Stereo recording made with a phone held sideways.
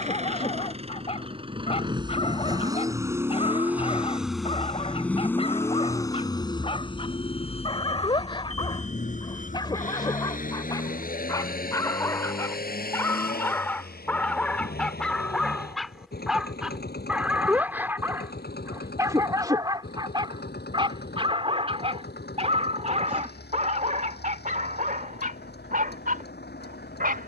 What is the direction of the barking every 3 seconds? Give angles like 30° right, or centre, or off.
40° left, 40° left, 30° left, 20° left, 10° left, centre, 20° right, 40° right, 50° right.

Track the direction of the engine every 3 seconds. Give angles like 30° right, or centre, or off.
30° right, centre, 40° left, 60° left, 70° left, 70° left, 80° left, 80° left, 80° left.